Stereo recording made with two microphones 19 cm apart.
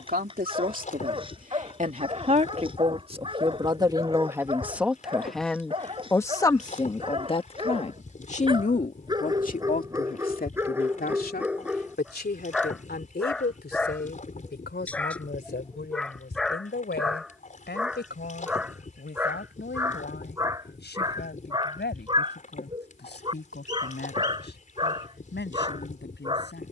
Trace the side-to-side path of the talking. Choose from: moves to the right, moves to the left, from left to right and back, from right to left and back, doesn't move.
moves to the left.